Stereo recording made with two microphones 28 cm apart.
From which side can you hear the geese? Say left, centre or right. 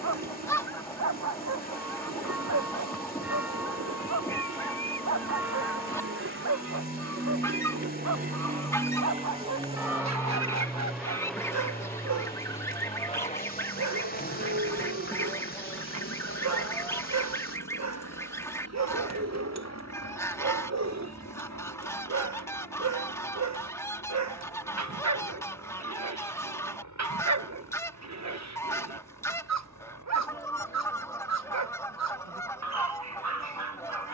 centre.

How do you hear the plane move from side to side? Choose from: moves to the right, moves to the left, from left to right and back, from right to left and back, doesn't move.
moves to the left.